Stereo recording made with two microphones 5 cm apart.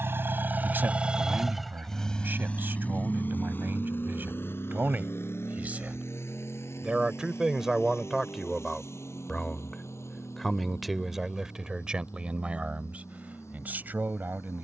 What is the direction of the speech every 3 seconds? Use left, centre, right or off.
right, right, centre, centre, right.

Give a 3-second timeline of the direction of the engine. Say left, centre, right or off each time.
centre, left, left, left, left.